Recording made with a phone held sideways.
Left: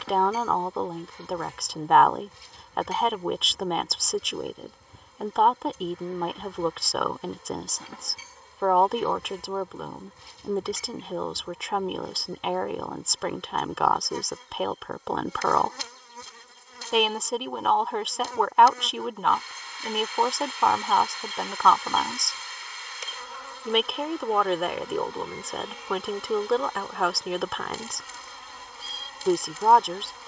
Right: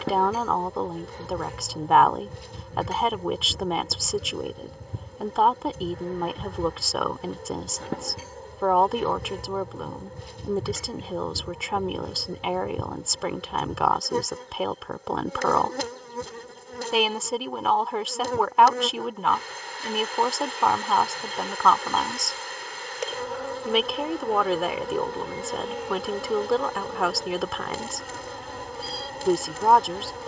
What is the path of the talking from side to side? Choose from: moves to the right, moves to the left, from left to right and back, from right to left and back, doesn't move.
doesn't move.